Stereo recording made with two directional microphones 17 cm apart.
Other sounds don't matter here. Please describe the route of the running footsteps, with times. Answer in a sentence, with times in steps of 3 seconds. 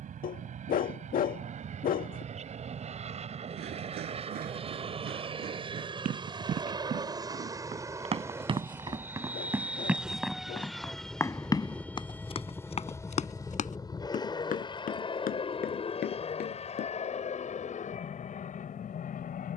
You can hear the running footsteps not at all from 0 s, on the right from 3 s, in the centre from 9 s, on the left from 12 s and not at all from 18 s.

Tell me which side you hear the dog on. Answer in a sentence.
In this clip you hear the dog on the left.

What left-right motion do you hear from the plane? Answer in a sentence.
You can hear the plane travel towards the left.